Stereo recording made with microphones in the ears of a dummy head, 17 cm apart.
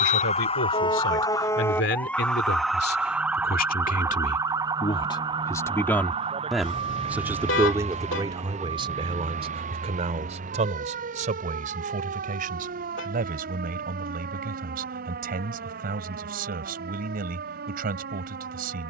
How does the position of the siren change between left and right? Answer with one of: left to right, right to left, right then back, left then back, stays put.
left to right.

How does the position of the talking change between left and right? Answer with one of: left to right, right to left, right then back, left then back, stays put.
left to right.